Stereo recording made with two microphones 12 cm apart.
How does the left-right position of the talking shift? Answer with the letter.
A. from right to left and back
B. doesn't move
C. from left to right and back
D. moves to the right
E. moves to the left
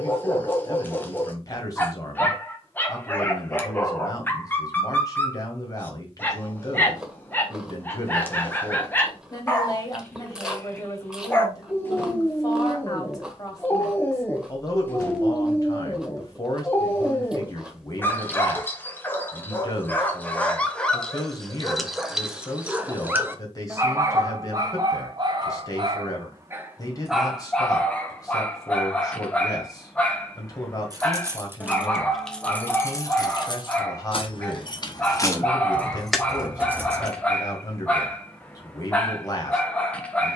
B.